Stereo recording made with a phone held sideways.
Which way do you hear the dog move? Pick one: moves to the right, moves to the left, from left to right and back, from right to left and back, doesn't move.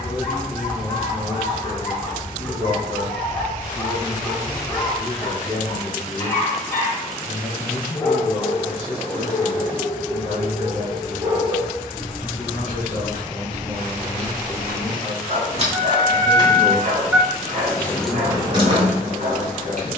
moves to the right.